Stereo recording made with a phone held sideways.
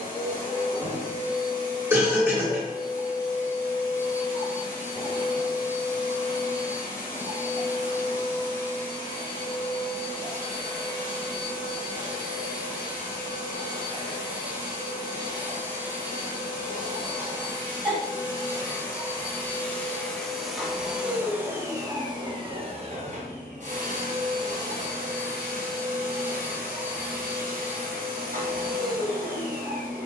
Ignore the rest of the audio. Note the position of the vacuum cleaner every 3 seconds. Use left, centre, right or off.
left, left, left, left, left, left, centre, right, right, right.